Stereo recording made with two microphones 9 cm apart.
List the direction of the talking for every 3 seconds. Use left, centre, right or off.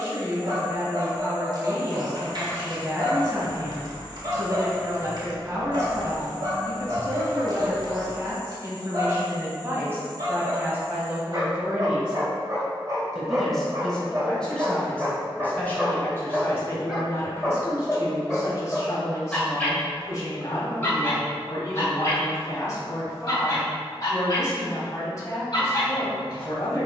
right, right, right, right, centre, left, left, left, left.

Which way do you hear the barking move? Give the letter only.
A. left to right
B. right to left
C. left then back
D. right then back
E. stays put
B.